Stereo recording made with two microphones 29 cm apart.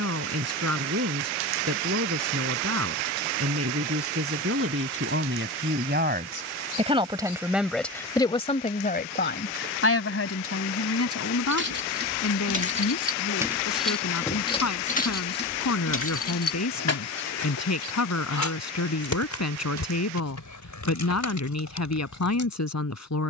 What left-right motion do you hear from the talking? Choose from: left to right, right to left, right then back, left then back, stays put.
right to left.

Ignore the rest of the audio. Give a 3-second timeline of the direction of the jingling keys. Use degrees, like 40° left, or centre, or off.
off, off, off, 40° right, 10° right, 50° left, 80° left, 80° left.